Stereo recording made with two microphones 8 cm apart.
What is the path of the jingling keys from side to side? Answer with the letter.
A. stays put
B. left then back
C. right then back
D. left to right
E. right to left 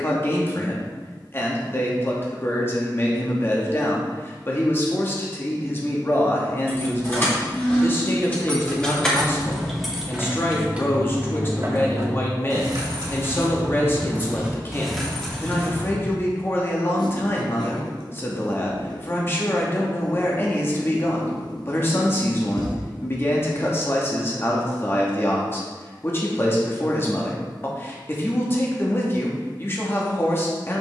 C.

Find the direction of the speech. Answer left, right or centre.
left.